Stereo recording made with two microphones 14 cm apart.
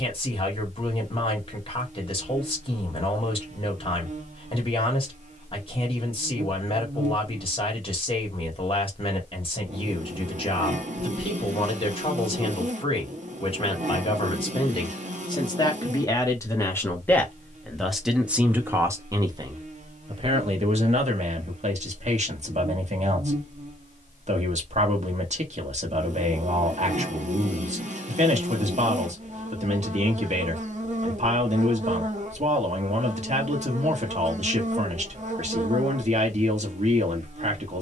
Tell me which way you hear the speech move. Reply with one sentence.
You can hear the speech go from the left side to the right.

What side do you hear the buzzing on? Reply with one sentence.
In this clip you hear the buzzing on the right.